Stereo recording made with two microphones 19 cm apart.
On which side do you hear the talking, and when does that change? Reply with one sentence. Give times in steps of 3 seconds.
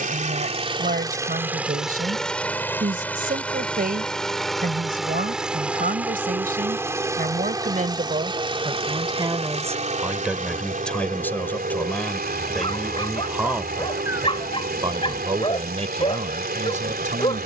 In this clip you hear the talking on the right from 0 s, in the centre from 9 s and on the right from 15 s.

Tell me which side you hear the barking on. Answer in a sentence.
You can hear the barking on the left.